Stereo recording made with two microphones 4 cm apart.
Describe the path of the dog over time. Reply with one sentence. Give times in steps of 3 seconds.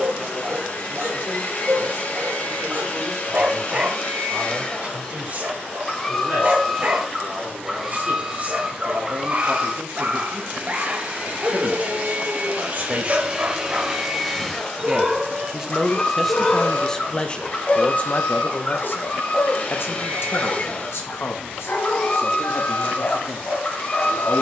In this clip you hear the dog on the right from 0 s, in the centre from 15 s and on the left from 18 s.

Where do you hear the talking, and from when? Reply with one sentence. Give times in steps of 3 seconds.
In this clip you hear the talking on the right from 0 s, in the centre from 15 s and on the left from 18 s.